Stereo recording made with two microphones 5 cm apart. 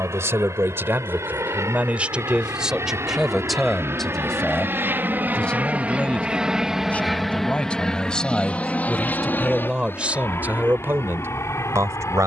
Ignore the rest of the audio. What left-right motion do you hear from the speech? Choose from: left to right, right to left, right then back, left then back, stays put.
left then back.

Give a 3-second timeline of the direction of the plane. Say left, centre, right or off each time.
right, right, centre, left.